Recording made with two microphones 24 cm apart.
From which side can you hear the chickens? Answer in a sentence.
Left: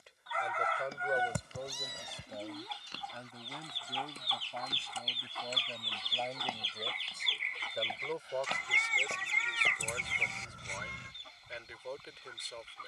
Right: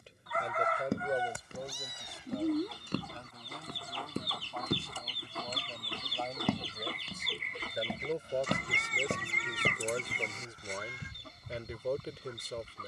In this clip you hear the chickens on the right.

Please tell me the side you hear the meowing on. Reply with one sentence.
In this clip you hear the meowing on the left.